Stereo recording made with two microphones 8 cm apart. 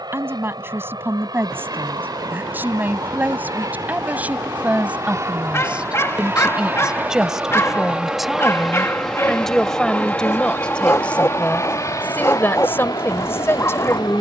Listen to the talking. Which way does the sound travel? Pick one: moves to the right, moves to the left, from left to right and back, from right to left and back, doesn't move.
moves to the left.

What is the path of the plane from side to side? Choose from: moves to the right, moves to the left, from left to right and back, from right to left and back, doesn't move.
moves to the left.